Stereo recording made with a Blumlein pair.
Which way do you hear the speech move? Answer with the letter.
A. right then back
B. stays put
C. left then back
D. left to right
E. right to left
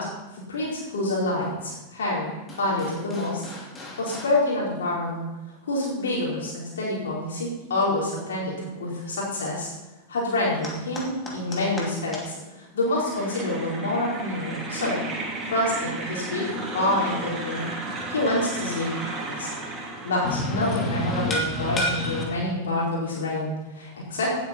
B.